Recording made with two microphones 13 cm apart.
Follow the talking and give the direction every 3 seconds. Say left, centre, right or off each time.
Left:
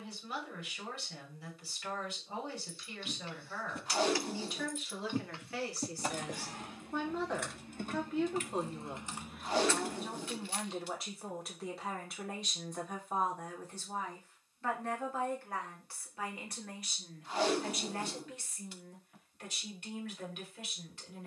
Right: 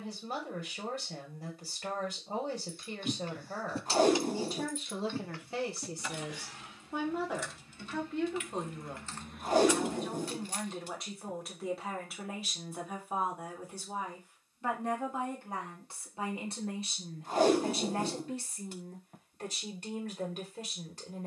right, right, centre, centre, centre, right, right.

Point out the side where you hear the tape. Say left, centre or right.
right.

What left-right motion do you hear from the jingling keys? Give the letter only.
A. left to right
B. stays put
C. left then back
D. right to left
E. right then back
C.